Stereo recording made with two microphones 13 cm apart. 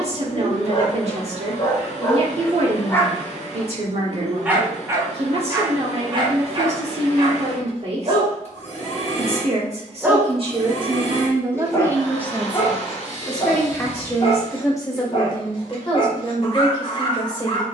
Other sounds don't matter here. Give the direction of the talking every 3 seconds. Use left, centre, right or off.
right, right, right, right, centre, left.